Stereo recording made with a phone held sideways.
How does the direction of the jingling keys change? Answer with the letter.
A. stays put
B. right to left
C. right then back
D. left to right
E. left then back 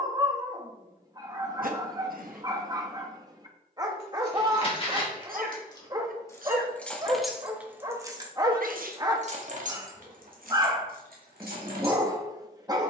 D.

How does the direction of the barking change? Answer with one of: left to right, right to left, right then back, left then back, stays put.
stays put.